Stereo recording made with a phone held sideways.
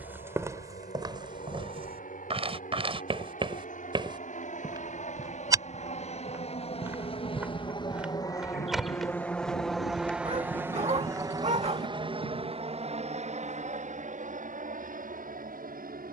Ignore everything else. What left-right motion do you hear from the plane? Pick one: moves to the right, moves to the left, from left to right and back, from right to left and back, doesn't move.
moves to the right.